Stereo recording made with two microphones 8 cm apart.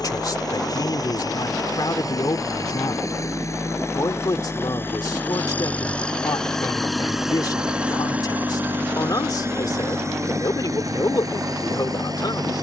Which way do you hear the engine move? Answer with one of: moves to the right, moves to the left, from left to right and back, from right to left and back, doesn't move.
moves to the right.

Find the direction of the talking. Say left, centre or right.
left.